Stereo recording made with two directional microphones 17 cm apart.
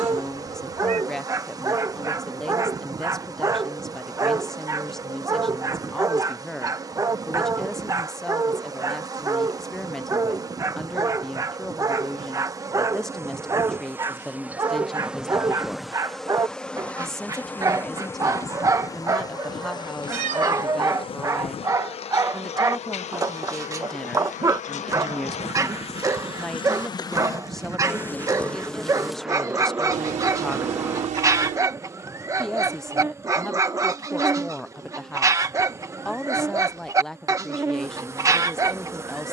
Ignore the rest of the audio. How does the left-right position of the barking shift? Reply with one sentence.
In this clip you hear the barking stay put.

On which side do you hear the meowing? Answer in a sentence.
You can hear the meowing on the right.